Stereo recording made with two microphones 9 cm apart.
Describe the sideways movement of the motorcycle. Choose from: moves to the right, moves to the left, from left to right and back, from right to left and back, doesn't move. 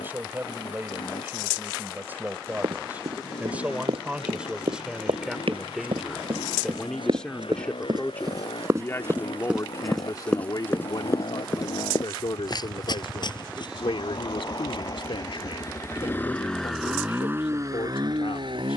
moves to the right.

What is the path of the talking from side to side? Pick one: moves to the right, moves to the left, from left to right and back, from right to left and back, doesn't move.
moves to the left.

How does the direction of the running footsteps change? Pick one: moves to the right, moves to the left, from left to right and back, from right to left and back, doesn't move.
moves to the left.